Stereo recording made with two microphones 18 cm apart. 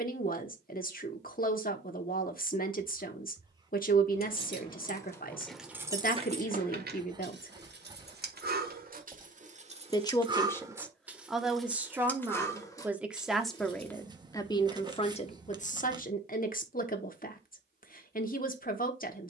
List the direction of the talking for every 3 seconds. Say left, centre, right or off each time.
left, left, left, centre, centre, left, left.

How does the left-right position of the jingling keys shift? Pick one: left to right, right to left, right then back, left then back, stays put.
right then back.